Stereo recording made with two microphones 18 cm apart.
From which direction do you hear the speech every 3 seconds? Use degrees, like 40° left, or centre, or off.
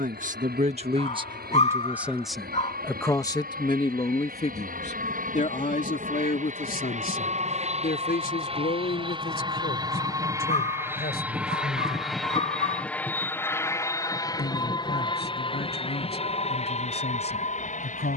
20° right, 30° left, 50° left, 60° left, 70° left, 70° left.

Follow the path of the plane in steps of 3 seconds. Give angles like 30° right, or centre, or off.
70° right, 60° right, 40° right, 20° right, 10° left, 30° left.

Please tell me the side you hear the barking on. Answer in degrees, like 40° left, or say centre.
40° left.